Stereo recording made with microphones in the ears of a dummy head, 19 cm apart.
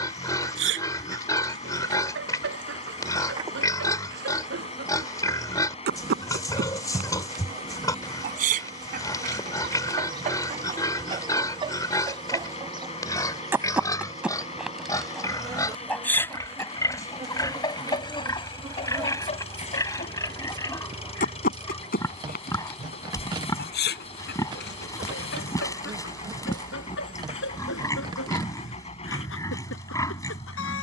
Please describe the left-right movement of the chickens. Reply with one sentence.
You can hear the chickens travel towards the left.